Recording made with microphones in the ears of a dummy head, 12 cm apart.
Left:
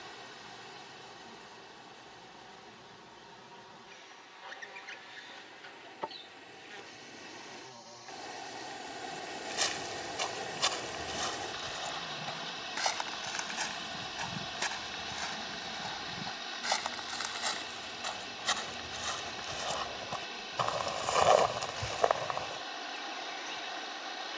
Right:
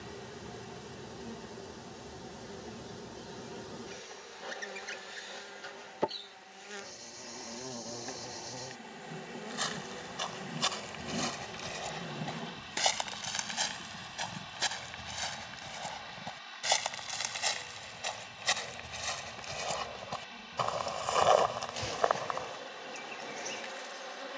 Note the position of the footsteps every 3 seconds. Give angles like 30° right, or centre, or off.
off, off, off, centre, 40° right, 30° right, 10° right, 10° left.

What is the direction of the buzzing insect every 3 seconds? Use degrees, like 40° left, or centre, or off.
50° right, 50° right, 50° right, 50° right, 10° right, 30° left, 10° left, 50° right.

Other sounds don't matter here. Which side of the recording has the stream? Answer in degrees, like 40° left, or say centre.
60° left.